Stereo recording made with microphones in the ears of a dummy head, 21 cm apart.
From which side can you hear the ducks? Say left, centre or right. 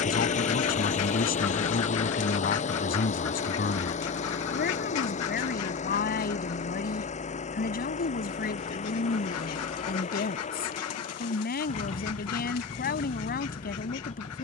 left.